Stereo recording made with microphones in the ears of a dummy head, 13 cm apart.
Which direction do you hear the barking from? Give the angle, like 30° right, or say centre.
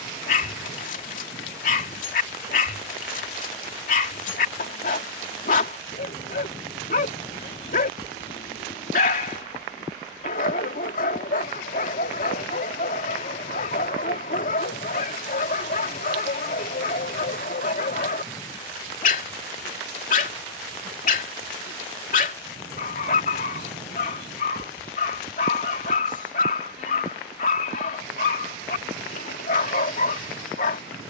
60° left.